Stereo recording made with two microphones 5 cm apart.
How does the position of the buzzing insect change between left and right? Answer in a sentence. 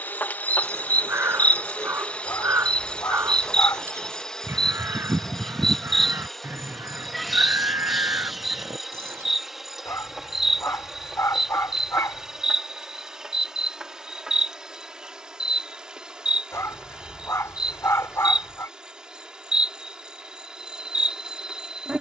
In this clip you hear the buzzing insect travel towards the right.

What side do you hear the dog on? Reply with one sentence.
In this clip you hear the dog on the left.